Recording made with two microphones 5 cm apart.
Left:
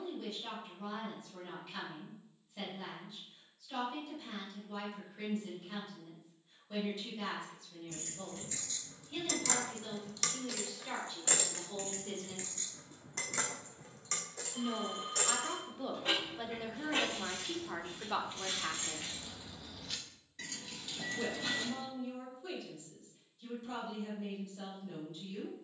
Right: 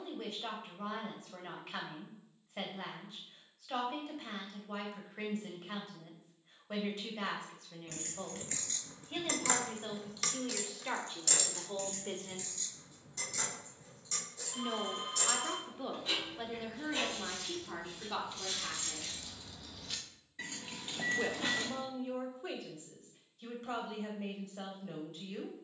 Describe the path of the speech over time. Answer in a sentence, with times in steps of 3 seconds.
In this clip you hear the speech on the right from 0 s, in the centre from 15 s, on the left from 18 s and on the right from 21 s.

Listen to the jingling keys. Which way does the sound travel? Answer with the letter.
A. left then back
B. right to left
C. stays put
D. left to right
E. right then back
A.